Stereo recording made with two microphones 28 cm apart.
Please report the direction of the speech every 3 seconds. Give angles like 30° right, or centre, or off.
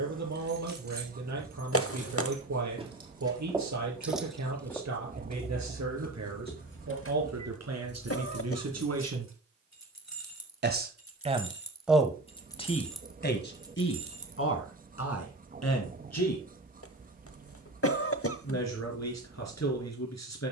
80° right, 80° right, 70° right, 30° right, 40° left, 60° left, 70° left.